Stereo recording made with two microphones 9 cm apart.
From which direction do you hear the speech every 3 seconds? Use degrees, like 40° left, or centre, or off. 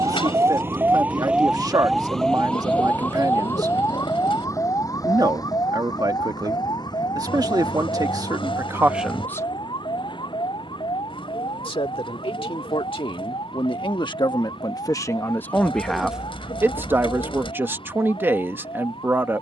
40° right, 40° right, 40° right, 40° left, 60° left, 10° right, 20° right.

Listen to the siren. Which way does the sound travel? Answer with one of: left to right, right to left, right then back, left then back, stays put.
right to left.